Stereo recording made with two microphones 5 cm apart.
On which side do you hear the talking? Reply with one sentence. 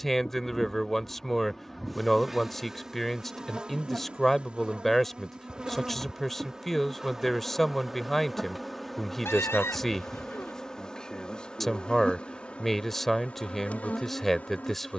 In this clip you hear the talking in the centre.